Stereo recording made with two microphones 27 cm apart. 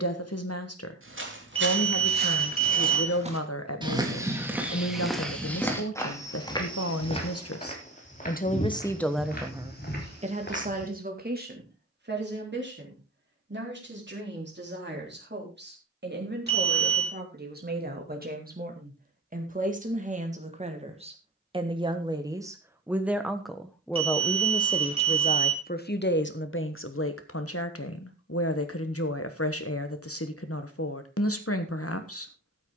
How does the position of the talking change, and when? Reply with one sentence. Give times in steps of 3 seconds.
In this clip you hear the talking on the left from 0 s, on the right from 9 s, in the centre from 21 s and on the left from 24 s.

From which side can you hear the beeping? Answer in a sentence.
You can hear the beeping on the right.